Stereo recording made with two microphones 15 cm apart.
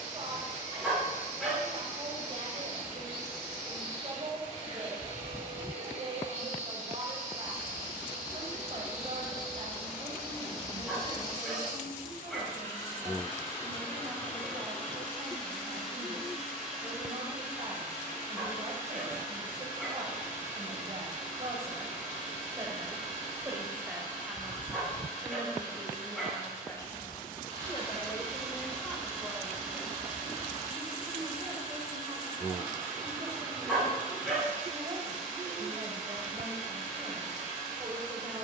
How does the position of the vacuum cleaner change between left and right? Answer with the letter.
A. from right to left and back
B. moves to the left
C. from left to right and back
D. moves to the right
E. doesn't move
A.